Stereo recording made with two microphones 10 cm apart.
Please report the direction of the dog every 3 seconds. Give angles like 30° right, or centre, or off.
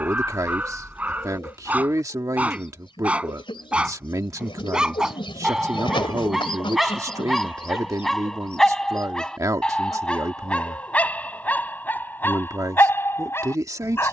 20° right, 10° right, centre, 10° left, 20° left.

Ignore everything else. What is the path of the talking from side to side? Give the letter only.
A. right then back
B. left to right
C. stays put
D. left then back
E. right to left
C.